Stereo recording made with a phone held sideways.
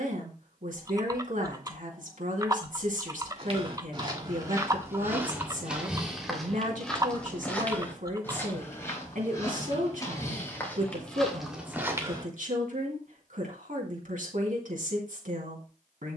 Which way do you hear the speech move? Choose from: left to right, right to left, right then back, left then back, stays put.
stays put.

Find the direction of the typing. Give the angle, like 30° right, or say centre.
30° right.